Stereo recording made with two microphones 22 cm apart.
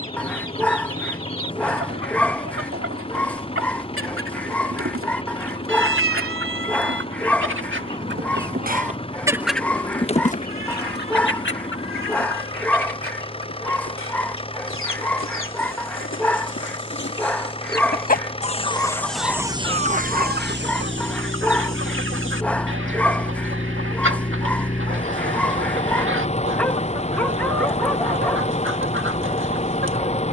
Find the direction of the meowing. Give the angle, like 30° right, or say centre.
70° right.